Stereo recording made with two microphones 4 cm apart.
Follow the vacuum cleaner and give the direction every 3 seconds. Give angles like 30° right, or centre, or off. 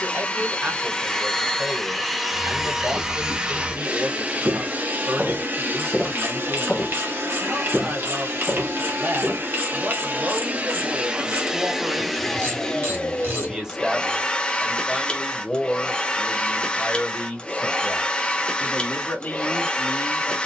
10° left, 30° right, 60° right, 30° right, 20° left, 20° left, 20° left.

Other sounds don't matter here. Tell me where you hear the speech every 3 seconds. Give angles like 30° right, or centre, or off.
50° right, 50° right, 50° right, 50° right, 10° right, 20° left, 40° left.